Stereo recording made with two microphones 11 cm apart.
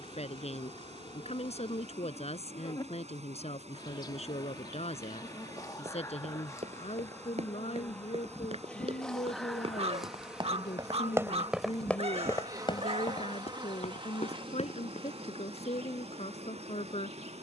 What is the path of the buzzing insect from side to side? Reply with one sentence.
You can hear the buzzing insect travel towards the right.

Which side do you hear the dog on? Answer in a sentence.
You can hear the dog on the right.